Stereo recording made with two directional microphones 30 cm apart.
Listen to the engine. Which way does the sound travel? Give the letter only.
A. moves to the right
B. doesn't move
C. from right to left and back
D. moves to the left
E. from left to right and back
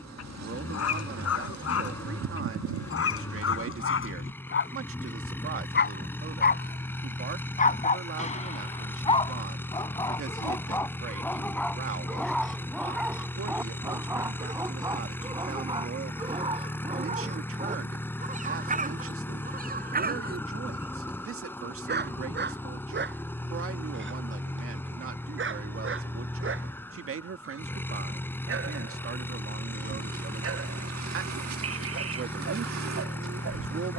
B.